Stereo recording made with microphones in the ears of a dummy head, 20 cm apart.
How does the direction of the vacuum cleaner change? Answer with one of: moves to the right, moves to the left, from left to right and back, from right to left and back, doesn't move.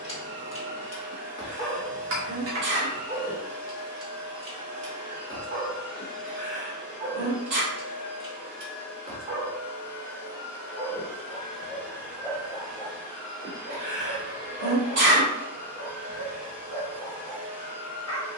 from right to left and back.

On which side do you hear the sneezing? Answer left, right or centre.
right.